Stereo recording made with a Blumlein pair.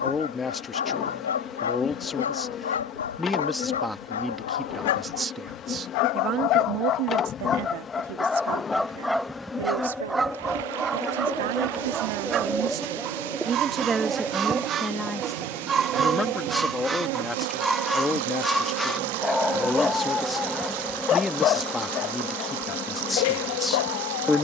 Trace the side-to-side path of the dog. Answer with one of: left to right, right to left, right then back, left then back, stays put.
right then back.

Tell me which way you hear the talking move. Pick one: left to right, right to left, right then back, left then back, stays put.
right then back.